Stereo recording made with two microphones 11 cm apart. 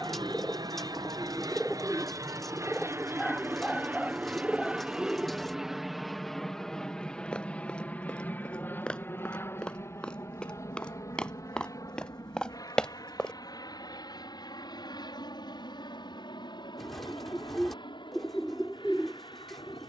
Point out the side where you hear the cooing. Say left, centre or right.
centre.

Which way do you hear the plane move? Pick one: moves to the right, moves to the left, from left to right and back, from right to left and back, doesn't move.
moves to the left.